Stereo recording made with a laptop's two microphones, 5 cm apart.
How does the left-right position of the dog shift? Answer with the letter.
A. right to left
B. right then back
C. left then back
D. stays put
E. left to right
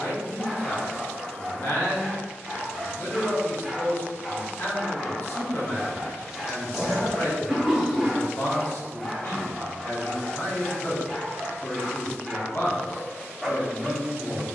D.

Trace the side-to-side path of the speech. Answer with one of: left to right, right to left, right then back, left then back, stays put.
stays put.